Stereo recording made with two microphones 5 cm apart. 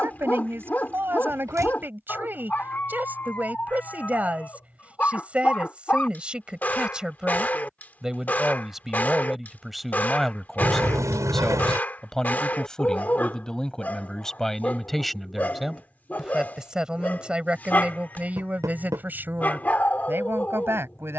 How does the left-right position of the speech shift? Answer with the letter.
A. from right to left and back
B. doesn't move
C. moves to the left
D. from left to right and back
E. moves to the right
A.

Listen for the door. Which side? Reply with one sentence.
You can hear the door on the right.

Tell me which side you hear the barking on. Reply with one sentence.
You can hear the barking on the left.